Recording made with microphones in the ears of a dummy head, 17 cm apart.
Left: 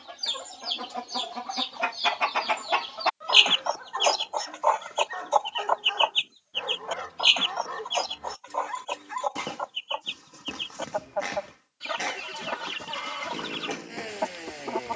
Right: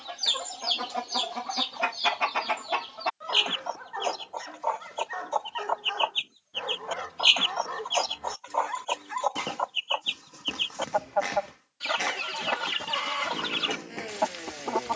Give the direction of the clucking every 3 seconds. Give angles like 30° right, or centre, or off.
10° right, 40° left, 10° right, 30° right, 30° right.